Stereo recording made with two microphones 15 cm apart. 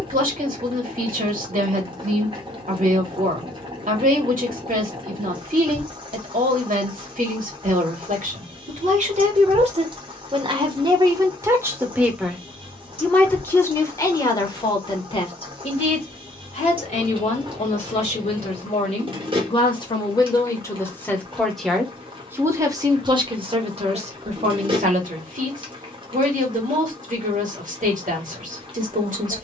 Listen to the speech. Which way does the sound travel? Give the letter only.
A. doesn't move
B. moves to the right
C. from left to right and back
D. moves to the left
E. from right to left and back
E.